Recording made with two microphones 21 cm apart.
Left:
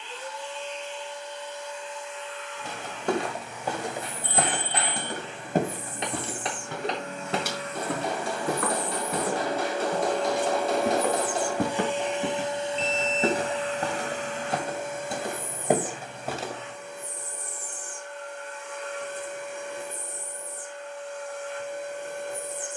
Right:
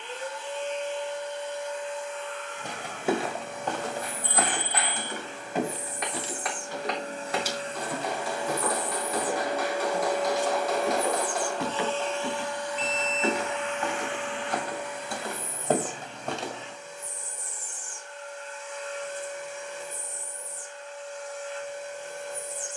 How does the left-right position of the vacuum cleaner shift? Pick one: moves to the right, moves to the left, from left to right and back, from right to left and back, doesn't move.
moves to the left.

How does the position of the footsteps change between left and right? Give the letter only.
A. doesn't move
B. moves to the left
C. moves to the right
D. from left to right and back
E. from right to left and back
E.